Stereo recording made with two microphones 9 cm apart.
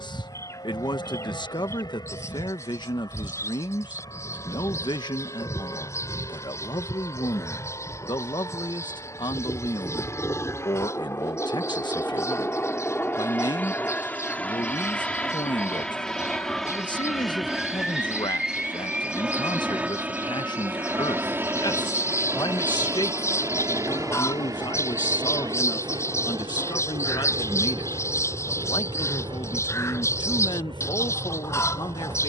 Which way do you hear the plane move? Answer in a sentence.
You can hear the plane move to the right.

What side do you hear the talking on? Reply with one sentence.
You can hear the talking on the left.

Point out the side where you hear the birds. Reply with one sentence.
In this clip you hear the birds on the left.